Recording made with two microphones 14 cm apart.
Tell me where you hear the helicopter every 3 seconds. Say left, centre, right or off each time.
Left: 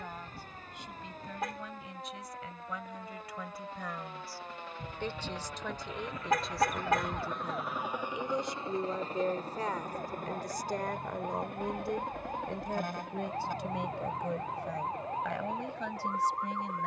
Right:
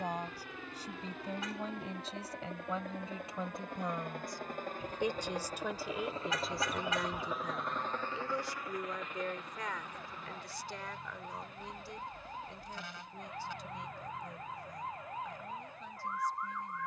right, right, centre, left, left, left.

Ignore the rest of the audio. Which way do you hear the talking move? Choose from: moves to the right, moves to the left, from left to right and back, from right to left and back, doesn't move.
moves to the left.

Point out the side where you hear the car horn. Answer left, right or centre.
left.